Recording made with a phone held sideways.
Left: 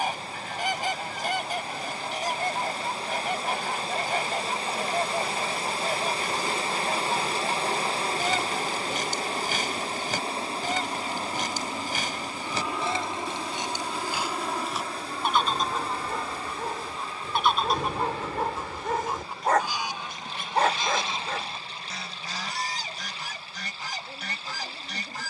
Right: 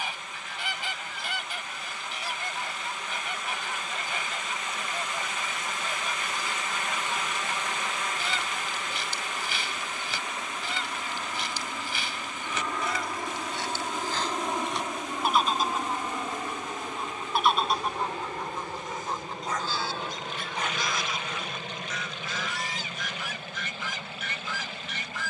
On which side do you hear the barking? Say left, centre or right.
left.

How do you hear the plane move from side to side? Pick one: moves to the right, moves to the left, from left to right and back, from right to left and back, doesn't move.
moves to the right.